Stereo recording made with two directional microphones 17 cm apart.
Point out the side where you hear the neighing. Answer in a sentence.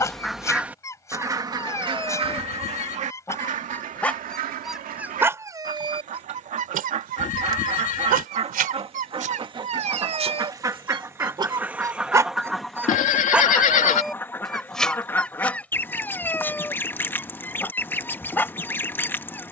You can hear the neighing on the left.